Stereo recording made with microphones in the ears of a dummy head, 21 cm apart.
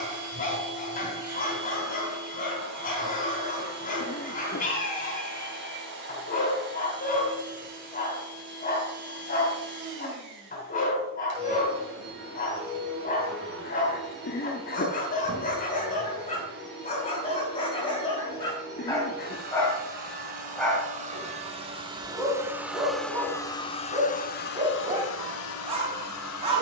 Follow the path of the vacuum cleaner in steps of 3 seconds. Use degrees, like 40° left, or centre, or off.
50° right, 50° right, 50° right, 50° right, 50° right, 50° right, 40° right, 10° right, 60° left.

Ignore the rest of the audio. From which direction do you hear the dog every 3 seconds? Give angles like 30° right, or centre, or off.
40° left, 40° left, 40° left, 40° left, 40° left, 30° left, 10° left, 10° right, 20° right.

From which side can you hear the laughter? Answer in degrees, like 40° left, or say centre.
40° left.